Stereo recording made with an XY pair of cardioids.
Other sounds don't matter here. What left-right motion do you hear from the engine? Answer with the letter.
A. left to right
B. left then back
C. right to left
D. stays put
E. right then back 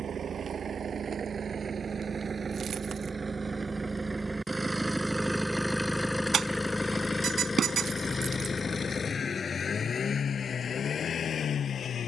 C.